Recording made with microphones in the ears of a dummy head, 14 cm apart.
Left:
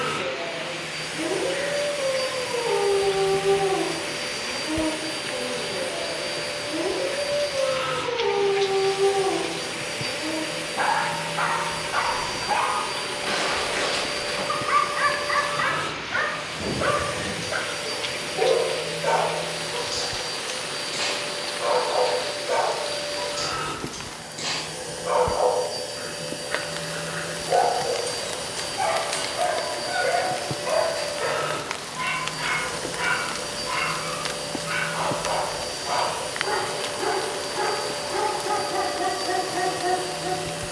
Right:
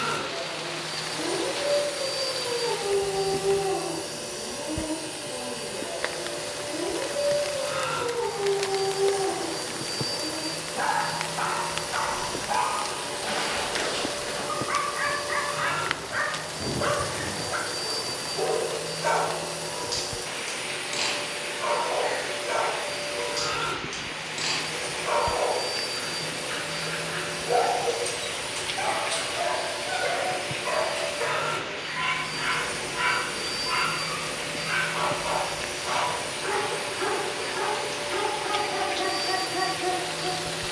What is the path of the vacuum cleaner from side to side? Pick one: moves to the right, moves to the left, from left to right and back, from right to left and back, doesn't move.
doesn't move.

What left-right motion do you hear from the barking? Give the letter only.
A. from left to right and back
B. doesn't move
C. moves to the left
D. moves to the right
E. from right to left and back
D.